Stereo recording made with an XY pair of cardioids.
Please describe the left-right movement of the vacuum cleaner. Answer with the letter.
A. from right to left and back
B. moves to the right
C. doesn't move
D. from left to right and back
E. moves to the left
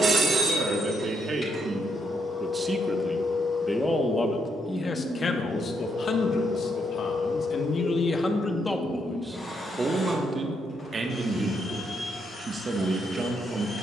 D.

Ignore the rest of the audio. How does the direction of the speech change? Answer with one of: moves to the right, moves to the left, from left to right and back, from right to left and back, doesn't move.
from right to left and back.